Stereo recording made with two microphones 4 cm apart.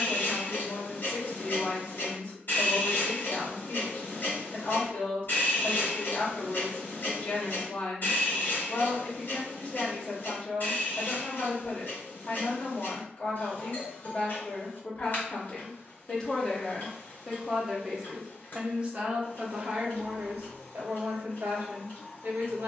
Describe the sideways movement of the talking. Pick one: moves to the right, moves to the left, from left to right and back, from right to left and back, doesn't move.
moves to the right.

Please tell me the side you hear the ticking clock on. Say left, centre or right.
left.